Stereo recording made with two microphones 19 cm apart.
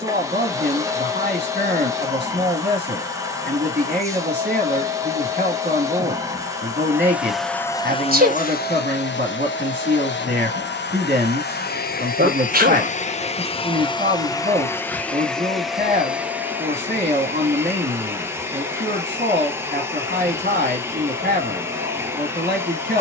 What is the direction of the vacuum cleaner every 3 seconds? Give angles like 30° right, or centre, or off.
20° right, 20° right, 10° left, 60° left, 30° left, 10° right, 10° right, 10° right.